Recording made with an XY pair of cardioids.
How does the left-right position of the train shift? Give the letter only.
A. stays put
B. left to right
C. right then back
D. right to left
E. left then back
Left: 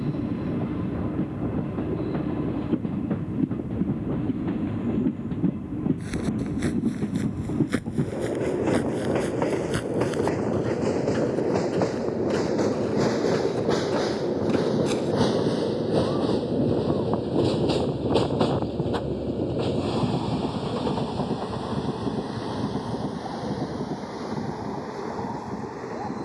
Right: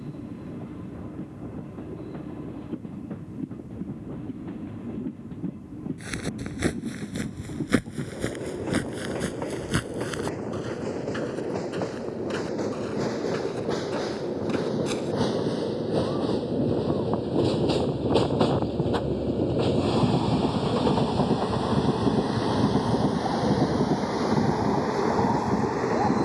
B.